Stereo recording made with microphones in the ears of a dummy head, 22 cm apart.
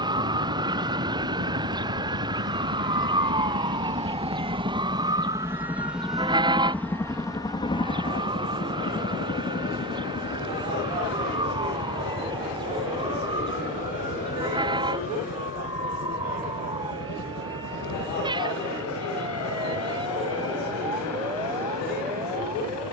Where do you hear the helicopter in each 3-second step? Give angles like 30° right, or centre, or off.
50° right, 20° right, 20° left, 40° left, 50° left, 60° left, 60° left, 70° left.